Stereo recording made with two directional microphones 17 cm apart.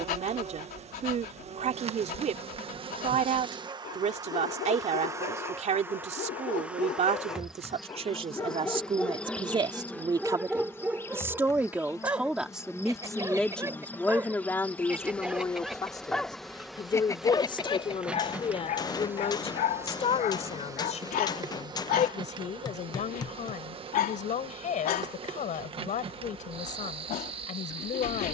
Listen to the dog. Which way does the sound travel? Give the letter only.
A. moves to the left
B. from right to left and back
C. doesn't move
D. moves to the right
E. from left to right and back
E.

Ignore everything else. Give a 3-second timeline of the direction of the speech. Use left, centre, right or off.
right, right, right, right, centre, left, left, left, left, left.